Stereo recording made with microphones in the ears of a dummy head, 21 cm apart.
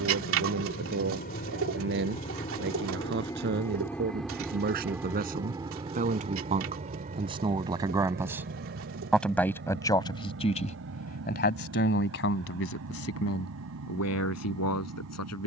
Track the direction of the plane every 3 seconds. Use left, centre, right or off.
left, centre, right, right, right.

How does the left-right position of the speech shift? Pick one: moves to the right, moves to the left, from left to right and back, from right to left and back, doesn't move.
moves to the left.